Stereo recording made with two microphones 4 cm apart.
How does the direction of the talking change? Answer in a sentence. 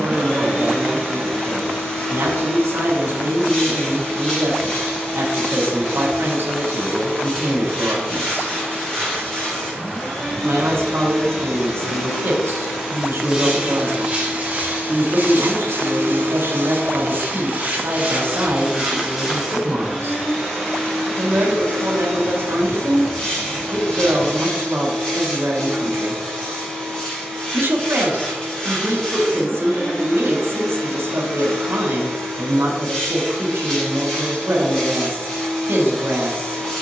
In this clip you hear the talking stay put.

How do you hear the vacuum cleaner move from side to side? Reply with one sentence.
You can hear the vacuum cleaner go right and come back.